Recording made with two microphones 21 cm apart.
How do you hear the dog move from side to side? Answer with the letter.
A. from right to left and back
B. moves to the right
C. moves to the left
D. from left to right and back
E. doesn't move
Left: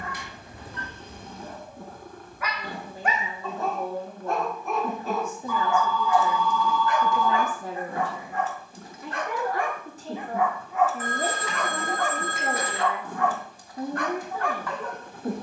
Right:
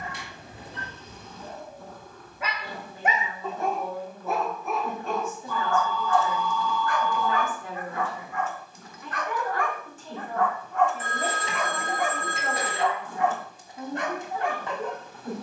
A.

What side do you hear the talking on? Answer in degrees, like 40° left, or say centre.
40° left.